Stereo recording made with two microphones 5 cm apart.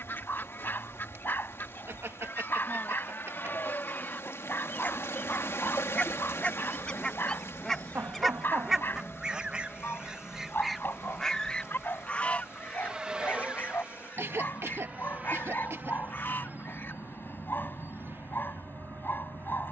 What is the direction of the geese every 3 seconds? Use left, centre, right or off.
left, left, centre, centre, left, left, off.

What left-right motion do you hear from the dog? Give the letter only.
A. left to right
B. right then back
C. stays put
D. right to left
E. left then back
C.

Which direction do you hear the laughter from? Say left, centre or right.
right.